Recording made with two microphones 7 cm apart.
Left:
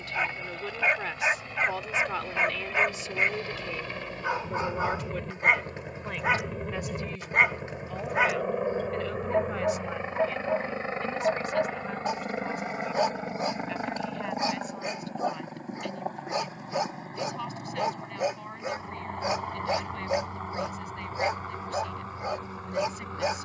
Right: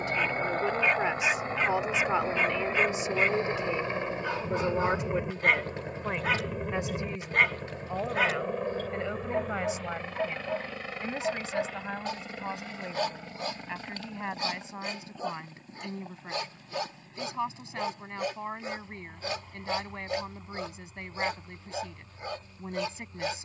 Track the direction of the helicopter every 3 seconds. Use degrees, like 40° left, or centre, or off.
40° right, 20° right, centre, 20° left, 40° left, 50° left, 50° left, 60° left.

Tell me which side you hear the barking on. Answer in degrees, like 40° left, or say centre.
20° left.